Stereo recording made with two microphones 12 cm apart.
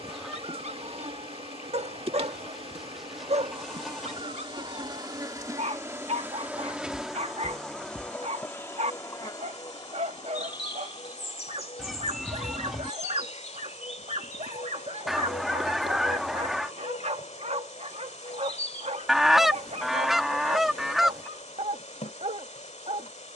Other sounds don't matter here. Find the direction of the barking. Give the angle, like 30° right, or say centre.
60° right.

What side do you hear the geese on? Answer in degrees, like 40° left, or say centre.
centre.